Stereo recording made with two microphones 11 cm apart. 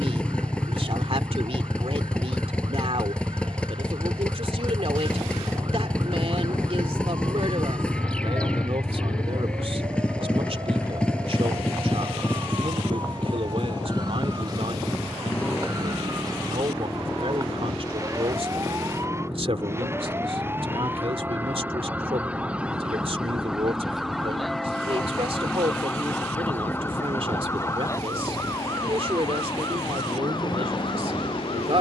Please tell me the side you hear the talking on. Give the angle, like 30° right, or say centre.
60° right.